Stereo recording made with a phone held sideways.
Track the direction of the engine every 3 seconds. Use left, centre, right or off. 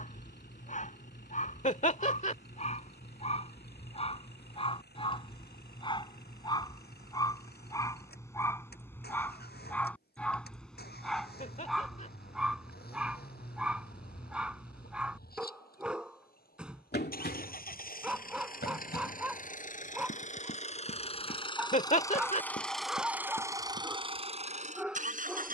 left, left, left, left, left, left, left, centre, right.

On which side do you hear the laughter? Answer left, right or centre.
left.